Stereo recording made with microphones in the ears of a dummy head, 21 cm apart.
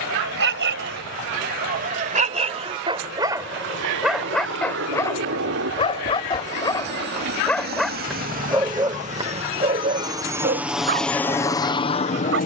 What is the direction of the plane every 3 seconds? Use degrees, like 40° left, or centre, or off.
60° right, 60° right, 50° right, 10° right.